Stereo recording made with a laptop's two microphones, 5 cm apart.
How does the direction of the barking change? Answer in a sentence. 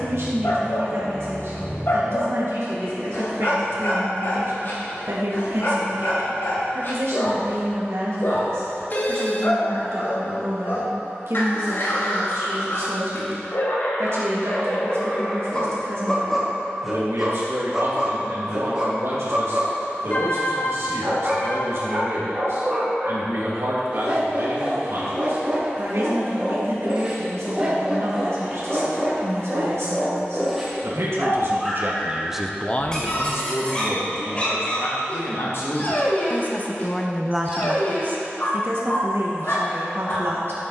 You can hear the barking go right and come back.